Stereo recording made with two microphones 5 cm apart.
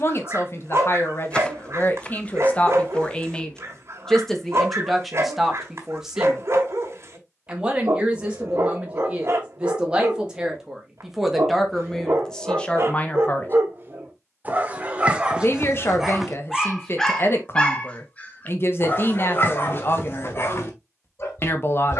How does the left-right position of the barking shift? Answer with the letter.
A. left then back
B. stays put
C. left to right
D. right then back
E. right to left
E.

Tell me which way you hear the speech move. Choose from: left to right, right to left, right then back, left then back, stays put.
right then back.